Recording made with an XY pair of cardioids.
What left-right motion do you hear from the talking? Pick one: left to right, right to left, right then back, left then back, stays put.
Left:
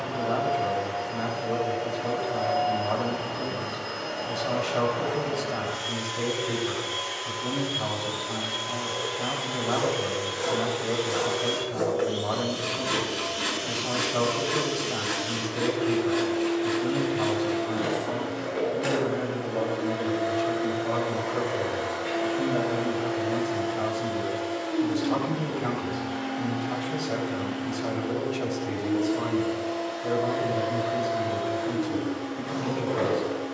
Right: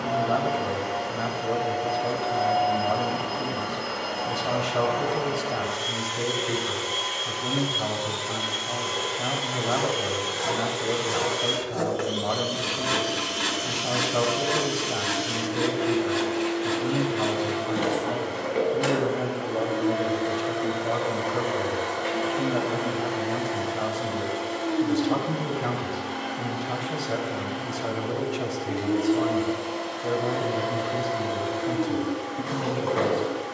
stays put.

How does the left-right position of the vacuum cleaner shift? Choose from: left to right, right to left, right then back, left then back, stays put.
stays put.